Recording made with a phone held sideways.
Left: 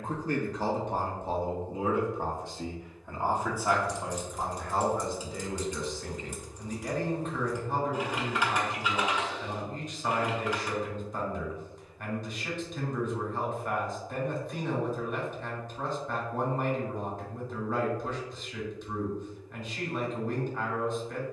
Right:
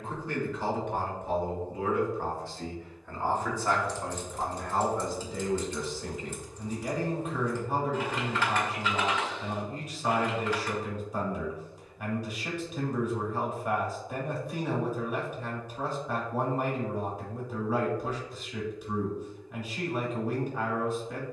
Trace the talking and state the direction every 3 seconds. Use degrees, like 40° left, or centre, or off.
30° left, centre, 10° right, 10° right, 10° right, 10° right, 10° right.